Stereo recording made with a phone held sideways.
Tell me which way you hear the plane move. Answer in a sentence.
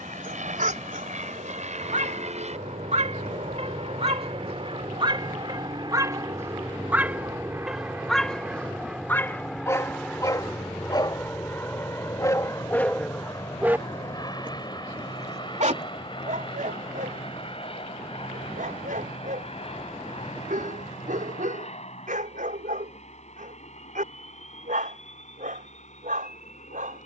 In this clip you hear the plane go from the right side to the left.